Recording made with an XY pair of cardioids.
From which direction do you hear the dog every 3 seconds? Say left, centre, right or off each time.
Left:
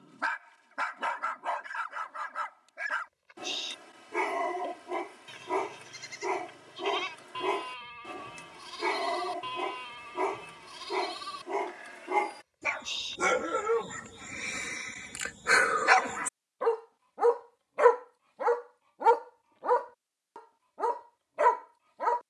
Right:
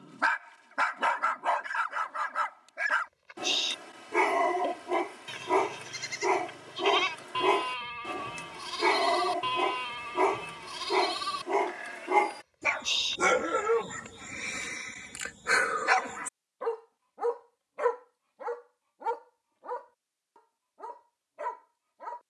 right, right, right, right, centre, left, left, left.